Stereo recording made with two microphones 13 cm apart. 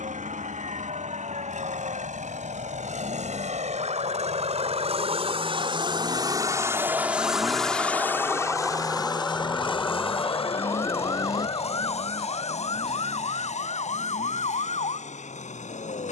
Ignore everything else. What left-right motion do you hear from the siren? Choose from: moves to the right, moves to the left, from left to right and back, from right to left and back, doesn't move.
moves to the left.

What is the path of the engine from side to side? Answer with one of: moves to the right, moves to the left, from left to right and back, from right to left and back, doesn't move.
moves to the left.